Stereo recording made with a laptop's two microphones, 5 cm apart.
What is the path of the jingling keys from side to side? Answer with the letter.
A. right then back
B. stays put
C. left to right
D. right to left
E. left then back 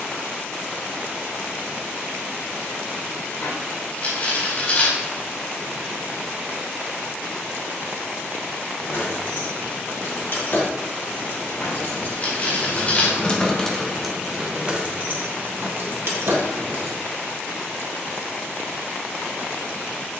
C.